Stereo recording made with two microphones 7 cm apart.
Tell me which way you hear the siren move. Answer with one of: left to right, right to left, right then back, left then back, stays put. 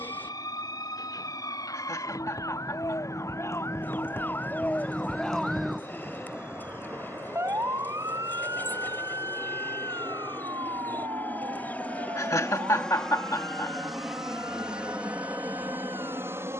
left to right.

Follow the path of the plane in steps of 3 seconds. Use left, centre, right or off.
left, left, left, left, centre, right.